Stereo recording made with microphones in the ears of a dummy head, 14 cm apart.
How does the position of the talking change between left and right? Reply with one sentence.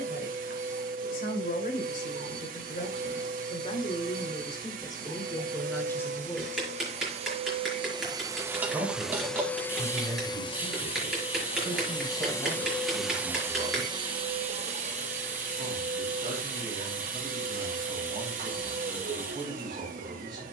In this clip you hear the talking move to the right.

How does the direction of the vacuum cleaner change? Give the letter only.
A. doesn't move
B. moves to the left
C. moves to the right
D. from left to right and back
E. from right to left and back
E.